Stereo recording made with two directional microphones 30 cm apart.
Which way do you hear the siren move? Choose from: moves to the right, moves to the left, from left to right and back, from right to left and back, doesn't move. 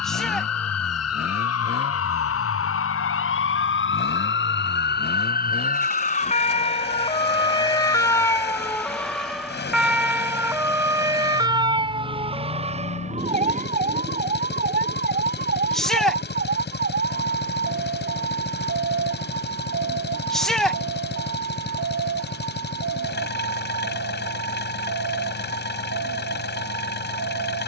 moves to the right.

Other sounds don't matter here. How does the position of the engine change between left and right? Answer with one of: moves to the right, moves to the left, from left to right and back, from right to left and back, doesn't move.
doesn't move.